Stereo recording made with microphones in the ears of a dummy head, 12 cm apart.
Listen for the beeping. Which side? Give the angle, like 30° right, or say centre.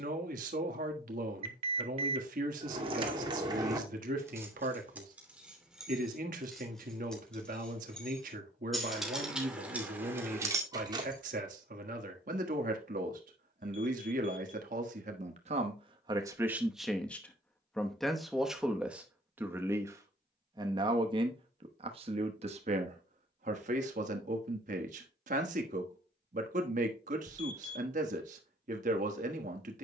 40° right.